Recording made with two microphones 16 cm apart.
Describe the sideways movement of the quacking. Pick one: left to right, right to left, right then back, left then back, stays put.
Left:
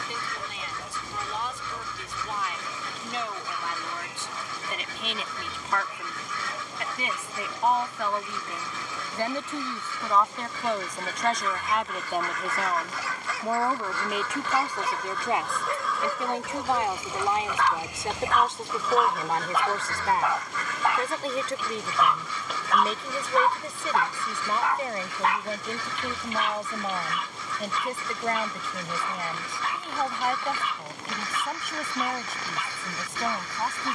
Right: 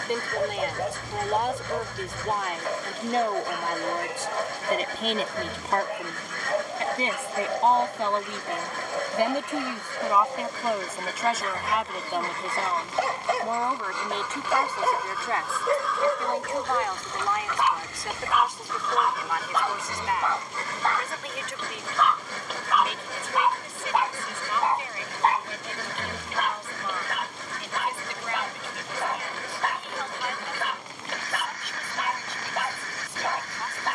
left then back.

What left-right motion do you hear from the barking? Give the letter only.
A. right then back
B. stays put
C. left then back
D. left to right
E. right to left
C.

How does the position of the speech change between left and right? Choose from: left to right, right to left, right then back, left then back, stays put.
right to left.